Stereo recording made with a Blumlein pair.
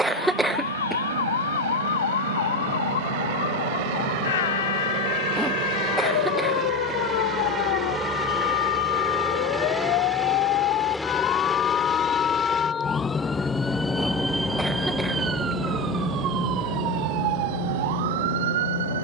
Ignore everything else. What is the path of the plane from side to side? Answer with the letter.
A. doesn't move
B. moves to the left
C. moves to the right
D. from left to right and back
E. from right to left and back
B.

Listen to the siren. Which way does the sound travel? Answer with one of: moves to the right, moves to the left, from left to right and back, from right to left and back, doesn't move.
moves to the right.